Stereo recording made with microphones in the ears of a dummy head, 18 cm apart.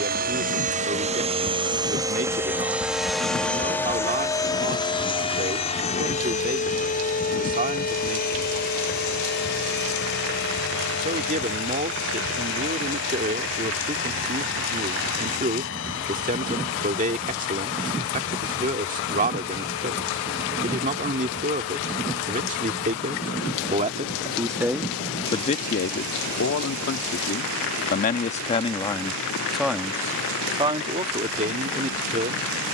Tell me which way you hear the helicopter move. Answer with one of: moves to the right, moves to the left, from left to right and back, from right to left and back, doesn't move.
moves to the left.